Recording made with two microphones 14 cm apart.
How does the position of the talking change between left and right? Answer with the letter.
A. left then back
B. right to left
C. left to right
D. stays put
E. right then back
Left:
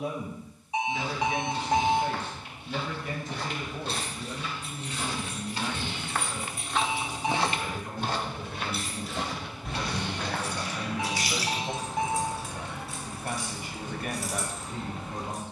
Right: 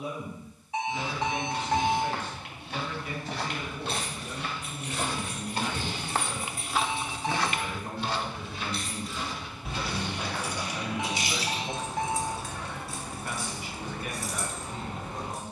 E.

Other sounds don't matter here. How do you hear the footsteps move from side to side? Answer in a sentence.
In this clip you hear the footsteps go from the right side to the left.